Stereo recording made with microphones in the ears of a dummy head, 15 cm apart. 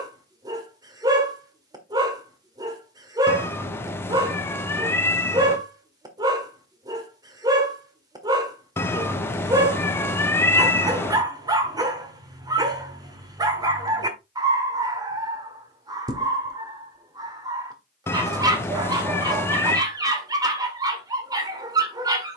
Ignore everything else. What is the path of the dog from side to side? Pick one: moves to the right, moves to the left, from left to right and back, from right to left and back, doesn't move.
doesn't move.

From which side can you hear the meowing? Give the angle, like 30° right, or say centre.
10° left.